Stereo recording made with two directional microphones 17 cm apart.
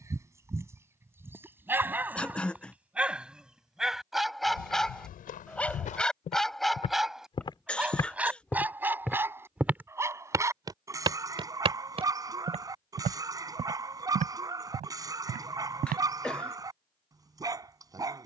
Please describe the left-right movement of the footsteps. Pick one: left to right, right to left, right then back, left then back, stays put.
left to right.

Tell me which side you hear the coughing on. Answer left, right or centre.
centre.